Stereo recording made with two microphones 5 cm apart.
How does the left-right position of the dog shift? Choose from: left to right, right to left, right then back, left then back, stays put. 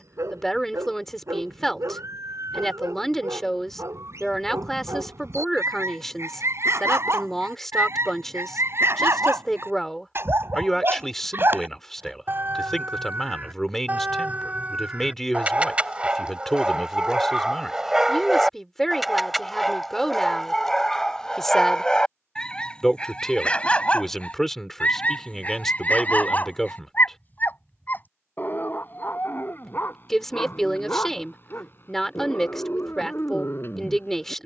right to left.